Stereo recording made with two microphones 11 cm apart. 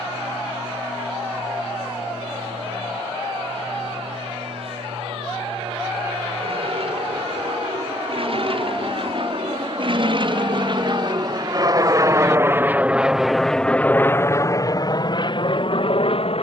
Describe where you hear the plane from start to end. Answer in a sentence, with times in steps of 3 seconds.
You can hear the plane on the right from 0 s, in the centre from 12 s and on the left from 15 s.